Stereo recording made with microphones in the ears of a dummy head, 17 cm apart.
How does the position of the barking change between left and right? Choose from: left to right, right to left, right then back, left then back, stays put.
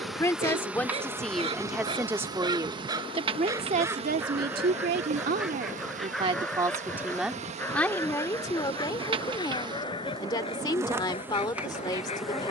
right to left.